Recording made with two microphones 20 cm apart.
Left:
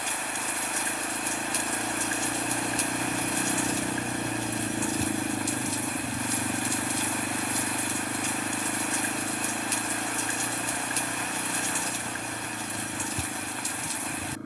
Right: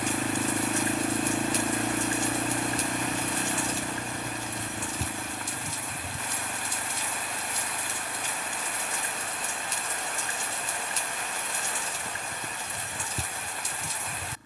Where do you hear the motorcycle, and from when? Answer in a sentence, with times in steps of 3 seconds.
You can hear the motorcycle on the right from 0 s and on the left from 3 s.